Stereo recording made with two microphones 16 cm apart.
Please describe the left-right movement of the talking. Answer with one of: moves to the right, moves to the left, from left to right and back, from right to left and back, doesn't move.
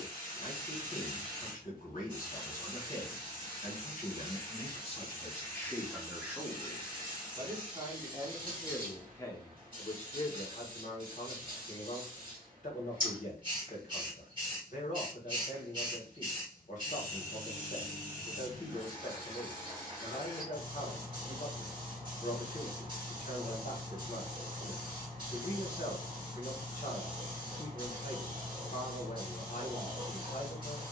from left to right and back.